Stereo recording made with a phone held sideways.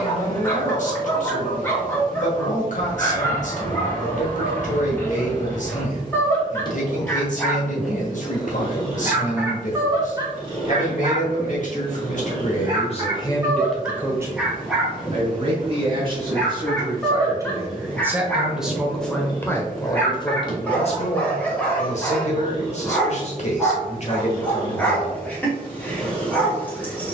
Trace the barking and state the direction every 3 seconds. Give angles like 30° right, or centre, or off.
20° left, 20° left, 10° left, 30° right, 20° right, 10° left, 10° left, 10° left, 10° left.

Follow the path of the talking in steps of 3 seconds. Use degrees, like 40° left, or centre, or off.
60° left, 60° left, 60° left, 60° left, 20° left, 30° right, 20° left, 50° left, 50° left.